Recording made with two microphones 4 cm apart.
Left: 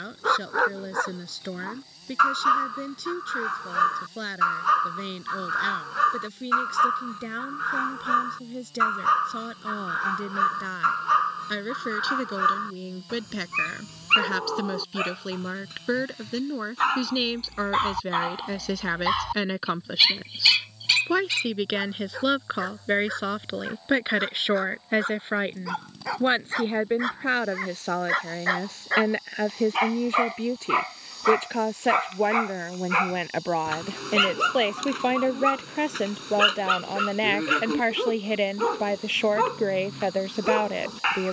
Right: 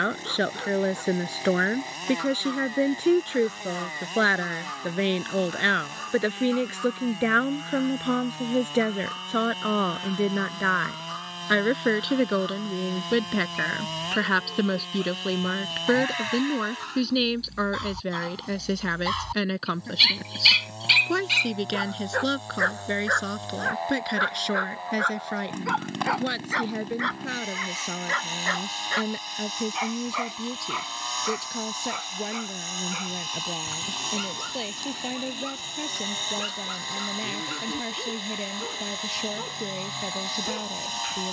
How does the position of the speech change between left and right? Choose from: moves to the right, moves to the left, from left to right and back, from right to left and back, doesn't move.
moves to the left.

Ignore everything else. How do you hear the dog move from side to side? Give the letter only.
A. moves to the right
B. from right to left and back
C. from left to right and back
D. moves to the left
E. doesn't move
C.